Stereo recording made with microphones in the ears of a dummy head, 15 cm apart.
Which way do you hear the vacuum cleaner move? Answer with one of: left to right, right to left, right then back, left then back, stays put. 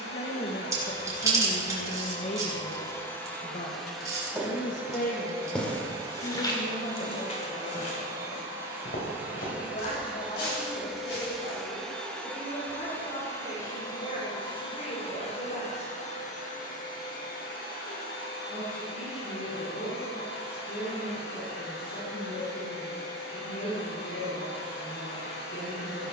right then back.